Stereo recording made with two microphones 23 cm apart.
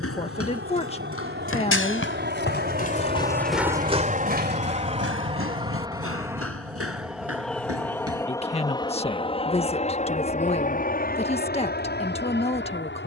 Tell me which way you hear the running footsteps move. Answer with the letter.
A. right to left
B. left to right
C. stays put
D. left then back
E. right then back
B.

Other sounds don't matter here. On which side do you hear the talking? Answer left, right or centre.
left.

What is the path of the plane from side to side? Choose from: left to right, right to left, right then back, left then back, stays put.
right to left.